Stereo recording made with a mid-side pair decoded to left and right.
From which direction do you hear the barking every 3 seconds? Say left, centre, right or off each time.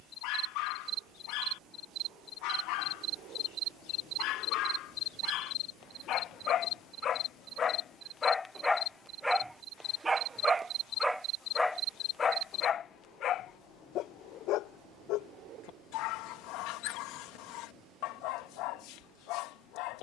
left, left, left, centre, left, left, left.